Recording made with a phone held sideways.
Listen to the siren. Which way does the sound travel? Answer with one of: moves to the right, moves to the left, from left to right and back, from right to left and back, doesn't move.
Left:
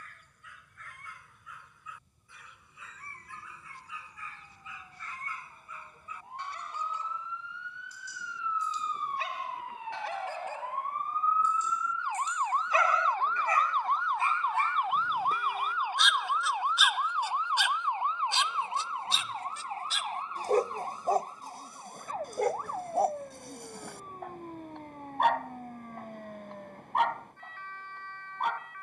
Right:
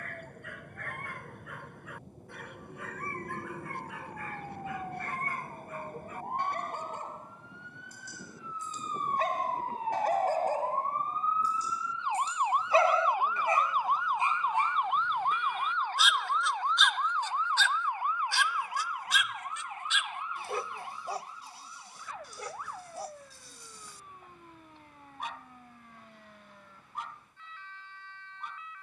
moves to the left.